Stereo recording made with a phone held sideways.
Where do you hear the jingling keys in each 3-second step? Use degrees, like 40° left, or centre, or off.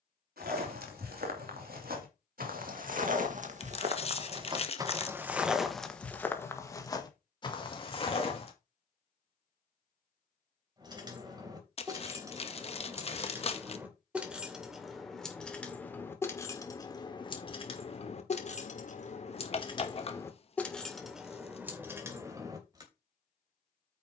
off, off, off, 30° right, 10° right, 20° left, 30° left, 10° right.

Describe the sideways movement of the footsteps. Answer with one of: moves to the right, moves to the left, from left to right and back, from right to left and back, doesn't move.
moves to the left.